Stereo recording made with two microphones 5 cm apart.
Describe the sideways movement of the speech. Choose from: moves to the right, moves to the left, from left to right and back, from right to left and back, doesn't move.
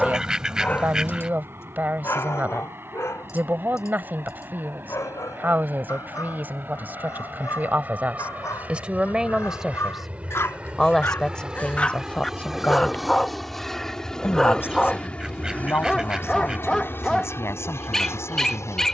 moves to the left.